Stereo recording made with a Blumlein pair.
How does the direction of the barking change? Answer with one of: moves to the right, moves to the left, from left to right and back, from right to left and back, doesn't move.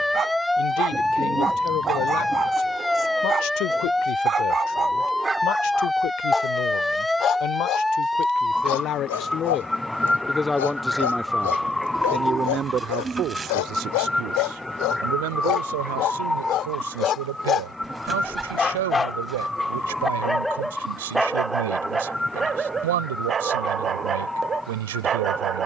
from right to left and back.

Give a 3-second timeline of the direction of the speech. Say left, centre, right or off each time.
left, left, left, centre, right, right, right, right, right.